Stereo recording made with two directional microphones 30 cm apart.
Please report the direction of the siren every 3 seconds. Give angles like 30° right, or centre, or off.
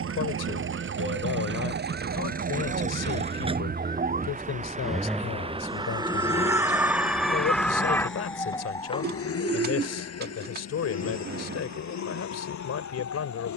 40° right, 30° right, centre, 30° left, 50° left.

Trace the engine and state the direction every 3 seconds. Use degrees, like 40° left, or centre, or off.
40° right, 10° right, 30° left, 60° left, 70° left.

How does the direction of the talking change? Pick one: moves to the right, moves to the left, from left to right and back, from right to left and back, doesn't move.
doesn't move.